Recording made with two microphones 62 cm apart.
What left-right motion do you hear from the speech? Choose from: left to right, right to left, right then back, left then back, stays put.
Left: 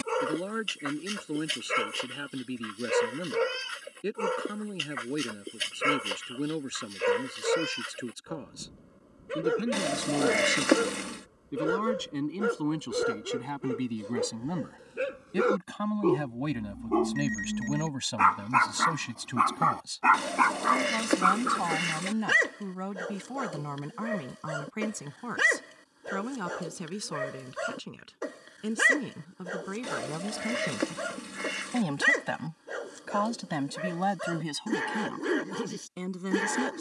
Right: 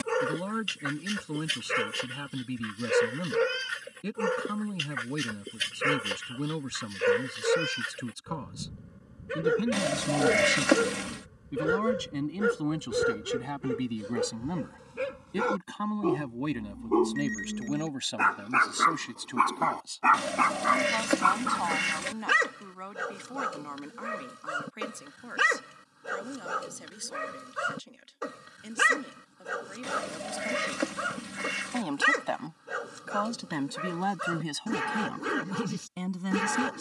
left then back.